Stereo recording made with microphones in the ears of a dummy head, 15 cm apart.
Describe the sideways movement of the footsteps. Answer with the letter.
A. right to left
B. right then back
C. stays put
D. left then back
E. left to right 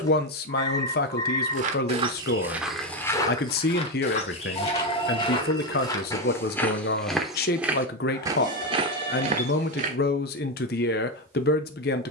D.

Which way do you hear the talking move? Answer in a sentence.
In this clip you hear the talking stay in one place.